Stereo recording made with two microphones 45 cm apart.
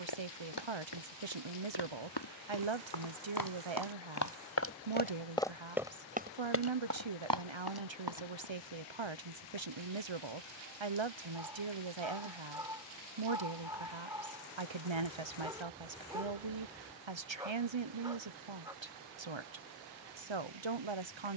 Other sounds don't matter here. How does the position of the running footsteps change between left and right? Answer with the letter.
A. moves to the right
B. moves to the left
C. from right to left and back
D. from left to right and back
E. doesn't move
A.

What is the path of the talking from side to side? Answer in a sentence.
You can hear the talking stay in one place.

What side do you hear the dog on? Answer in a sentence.
In this clip you hear the dog in the centre.